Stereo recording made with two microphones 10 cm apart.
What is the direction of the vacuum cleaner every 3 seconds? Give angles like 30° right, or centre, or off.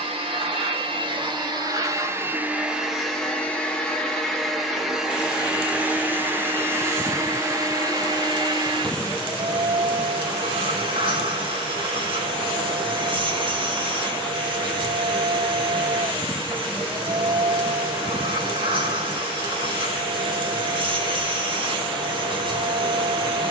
40° right, centre, 30° right, 50° right, 50° right, 50° right, 50° right, 50° right.